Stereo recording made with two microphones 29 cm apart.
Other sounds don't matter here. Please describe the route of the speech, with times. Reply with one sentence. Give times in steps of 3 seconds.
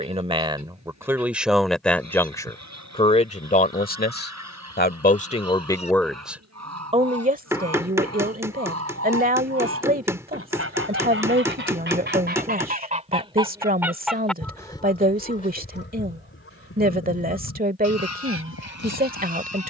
You can hear the speech in the centre from 0 s, on the left from 3 s and on the right from 6 s.